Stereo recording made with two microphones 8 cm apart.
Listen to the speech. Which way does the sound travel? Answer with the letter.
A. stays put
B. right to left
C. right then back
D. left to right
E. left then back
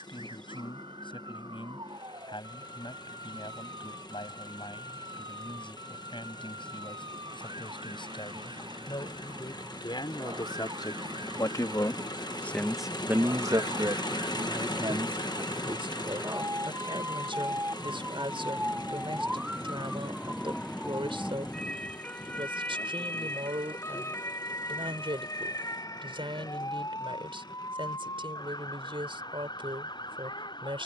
D.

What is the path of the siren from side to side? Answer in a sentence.
You can hear the siren go from the right side to the left.